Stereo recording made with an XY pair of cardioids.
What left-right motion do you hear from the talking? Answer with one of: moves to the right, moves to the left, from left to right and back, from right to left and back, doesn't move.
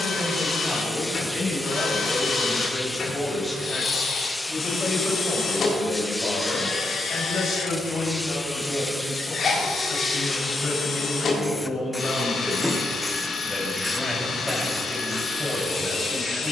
from right to left and back.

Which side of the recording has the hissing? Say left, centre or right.
centre.